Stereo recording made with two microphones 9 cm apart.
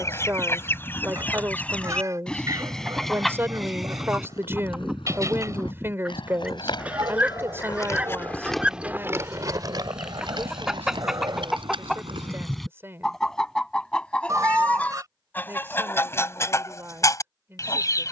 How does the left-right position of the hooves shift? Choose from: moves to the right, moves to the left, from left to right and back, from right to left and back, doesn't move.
moves to the right.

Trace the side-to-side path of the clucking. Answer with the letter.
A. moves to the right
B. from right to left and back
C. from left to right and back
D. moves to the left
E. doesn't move
C.